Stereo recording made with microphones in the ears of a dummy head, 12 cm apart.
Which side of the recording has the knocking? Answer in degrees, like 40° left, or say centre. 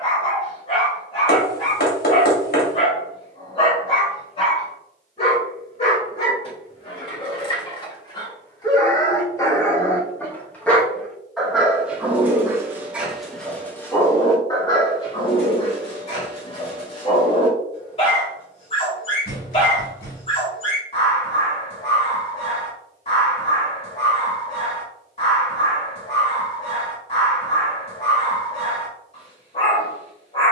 70° left.